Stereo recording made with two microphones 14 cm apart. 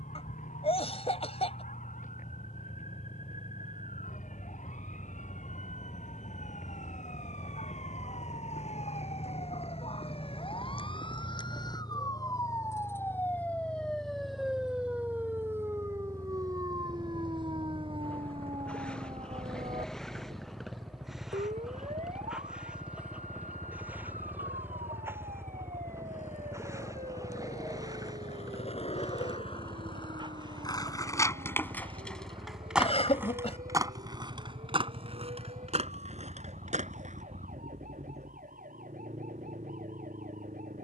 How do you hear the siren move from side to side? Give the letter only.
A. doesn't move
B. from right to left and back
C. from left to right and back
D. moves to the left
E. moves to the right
E.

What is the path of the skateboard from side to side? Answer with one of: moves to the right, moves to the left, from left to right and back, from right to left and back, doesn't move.
moves to the right.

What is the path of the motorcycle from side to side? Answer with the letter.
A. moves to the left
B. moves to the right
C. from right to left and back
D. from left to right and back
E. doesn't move
B.